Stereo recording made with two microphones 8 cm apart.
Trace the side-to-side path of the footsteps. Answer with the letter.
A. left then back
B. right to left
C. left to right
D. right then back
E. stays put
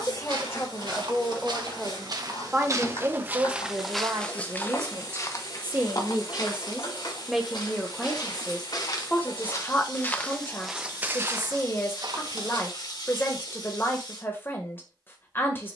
A.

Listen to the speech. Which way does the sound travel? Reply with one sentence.
You can hear the speech go right and come back.